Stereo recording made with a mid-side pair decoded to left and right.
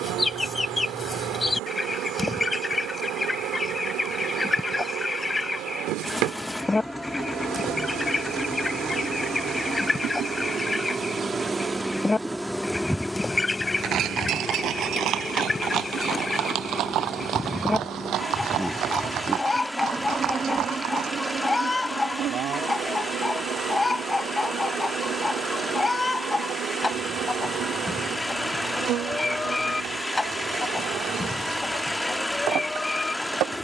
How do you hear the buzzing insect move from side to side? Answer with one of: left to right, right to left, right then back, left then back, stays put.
left then back.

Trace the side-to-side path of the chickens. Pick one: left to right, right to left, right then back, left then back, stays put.
stays put.